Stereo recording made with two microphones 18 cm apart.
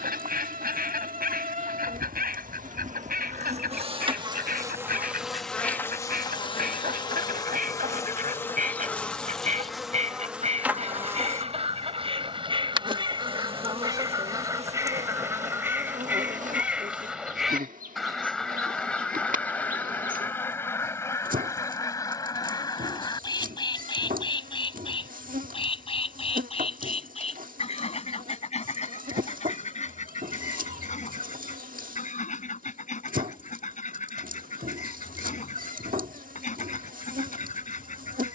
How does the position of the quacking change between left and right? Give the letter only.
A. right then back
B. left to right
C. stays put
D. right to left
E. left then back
D.